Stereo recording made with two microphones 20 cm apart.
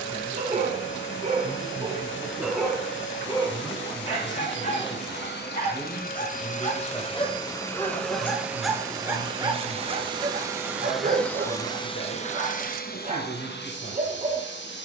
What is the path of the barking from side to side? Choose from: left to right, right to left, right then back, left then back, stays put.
left then back.